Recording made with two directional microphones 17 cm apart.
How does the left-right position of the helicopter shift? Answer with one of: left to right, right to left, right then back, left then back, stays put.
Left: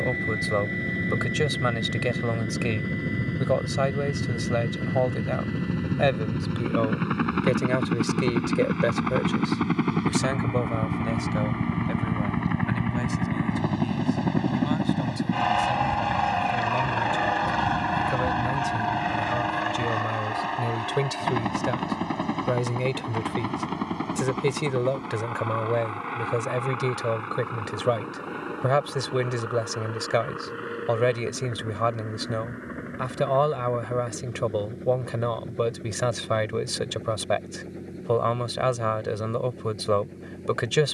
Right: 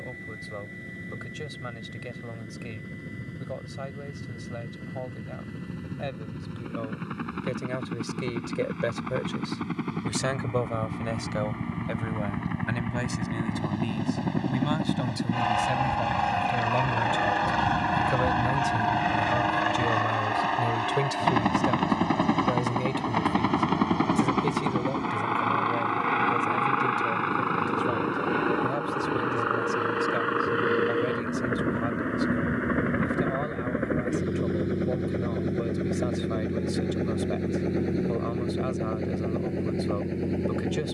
left to right.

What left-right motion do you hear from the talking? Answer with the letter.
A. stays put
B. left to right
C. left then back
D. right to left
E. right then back
E.